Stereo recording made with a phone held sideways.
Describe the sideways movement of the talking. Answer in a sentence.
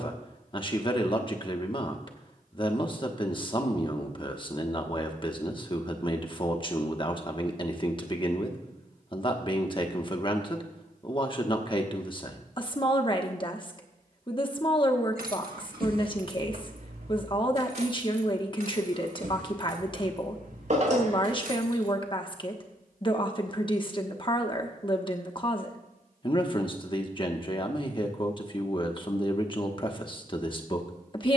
In this clip you hear the talking stay in one place.